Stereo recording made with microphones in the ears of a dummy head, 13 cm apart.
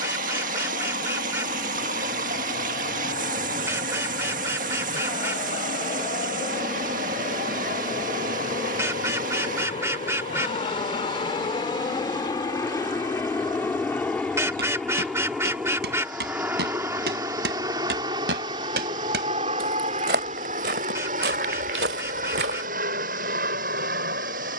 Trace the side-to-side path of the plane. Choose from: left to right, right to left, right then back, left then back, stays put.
left to right.